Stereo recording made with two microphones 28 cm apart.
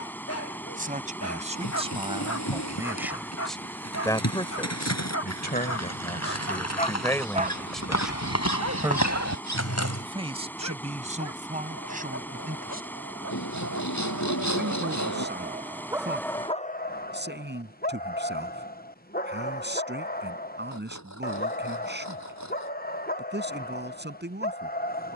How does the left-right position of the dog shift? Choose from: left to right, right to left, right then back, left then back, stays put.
right then back.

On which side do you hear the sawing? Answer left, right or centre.
left.